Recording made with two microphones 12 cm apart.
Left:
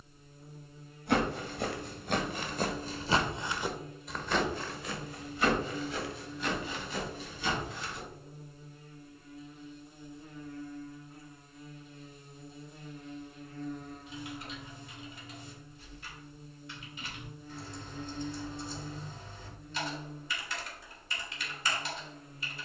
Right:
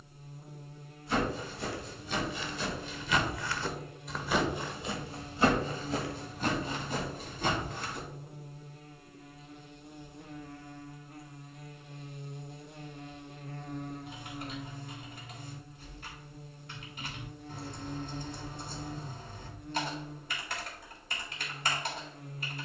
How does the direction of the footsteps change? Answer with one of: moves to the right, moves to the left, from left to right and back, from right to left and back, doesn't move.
moves to the right.